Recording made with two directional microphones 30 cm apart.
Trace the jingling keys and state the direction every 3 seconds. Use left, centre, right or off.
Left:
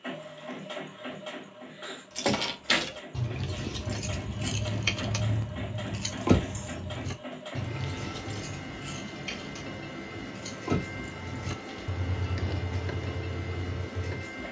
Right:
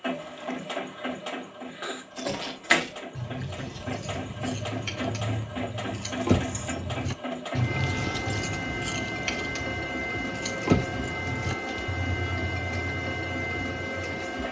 left, left, right, right, left.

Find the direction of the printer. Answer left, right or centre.
right.